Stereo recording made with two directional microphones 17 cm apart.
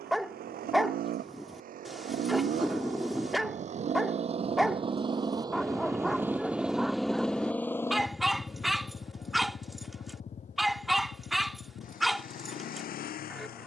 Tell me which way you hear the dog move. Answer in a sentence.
In this clip you hear the dog stay put.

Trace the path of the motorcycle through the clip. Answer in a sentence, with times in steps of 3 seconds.
In this clip you hear the motorcycle on the right from 0 s, in the centre from 6 s and on the left from 9 s.